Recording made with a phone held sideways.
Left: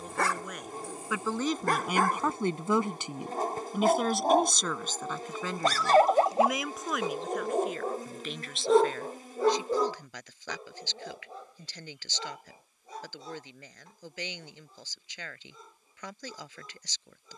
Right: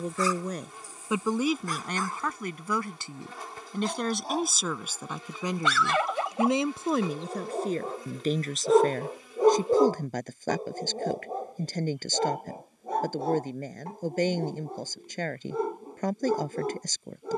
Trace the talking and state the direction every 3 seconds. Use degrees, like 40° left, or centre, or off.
10° right, centre, 40° right, 50° right, 50° right, 50° right.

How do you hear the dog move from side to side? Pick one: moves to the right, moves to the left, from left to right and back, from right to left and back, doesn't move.
moves to the right.